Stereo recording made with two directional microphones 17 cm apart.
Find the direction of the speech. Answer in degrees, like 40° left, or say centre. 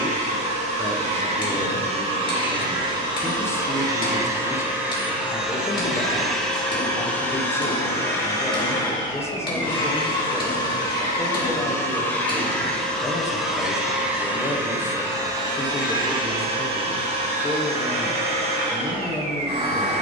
10° left.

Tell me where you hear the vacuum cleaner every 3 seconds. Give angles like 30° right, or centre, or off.
40° right, 10° right, 10° left, 20° left, centre, 30° right, 40° right.